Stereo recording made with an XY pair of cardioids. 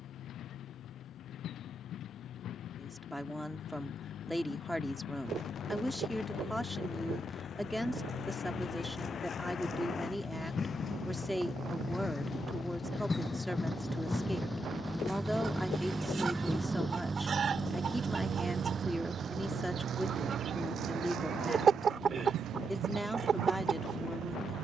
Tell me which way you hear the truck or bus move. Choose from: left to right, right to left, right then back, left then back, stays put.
left to right.